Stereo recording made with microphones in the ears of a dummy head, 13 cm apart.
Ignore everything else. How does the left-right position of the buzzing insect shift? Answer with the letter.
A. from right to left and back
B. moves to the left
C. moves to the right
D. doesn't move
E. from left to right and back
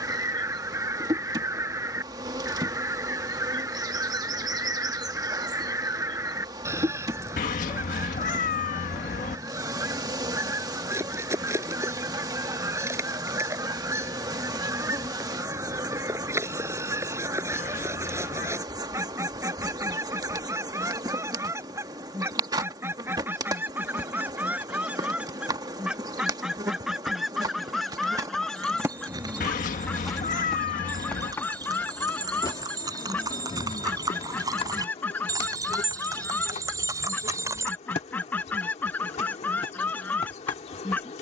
B.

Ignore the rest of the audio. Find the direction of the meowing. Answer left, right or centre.
left.